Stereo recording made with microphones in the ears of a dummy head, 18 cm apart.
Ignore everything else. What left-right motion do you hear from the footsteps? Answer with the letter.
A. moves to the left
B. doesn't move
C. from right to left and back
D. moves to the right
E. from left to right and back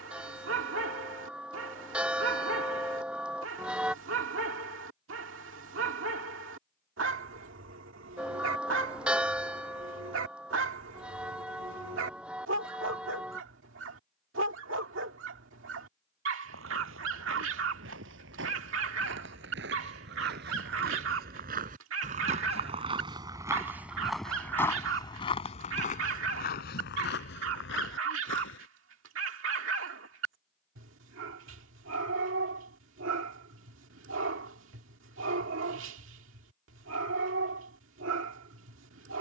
A.